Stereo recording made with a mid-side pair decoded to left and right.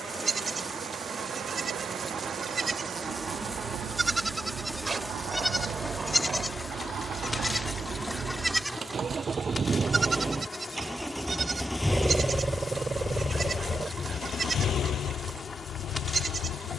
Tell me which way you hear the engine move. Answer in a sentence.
You can hear the engine move to the left.